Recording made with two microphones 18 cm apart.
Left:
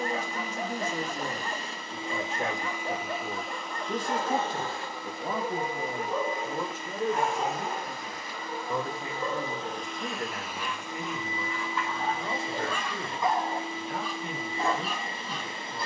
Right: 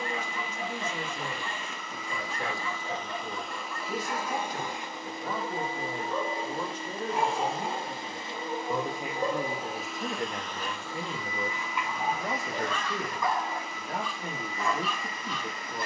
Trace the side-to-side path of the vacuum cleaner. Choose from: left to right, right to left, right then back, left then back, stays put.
right then back.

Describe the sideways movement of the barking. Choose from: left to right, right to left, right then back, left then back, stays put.
right then back.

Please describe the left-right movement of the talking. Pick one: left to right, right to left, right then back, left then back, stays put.
left to right.